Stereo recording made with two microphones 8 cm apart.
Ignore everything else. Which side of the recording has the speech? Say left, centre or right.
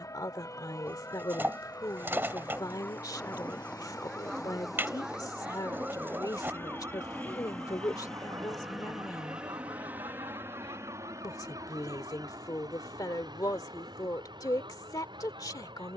left.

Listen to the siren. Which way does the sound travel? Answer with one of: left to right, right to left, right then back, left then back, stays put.
left to right.